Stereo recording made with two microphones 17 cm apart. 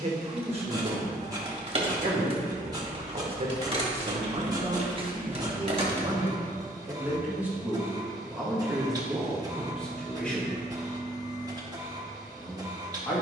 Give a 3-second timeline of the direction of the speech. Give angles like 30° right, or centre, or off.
40° right, 40° right, 10° right, centre, 10° left.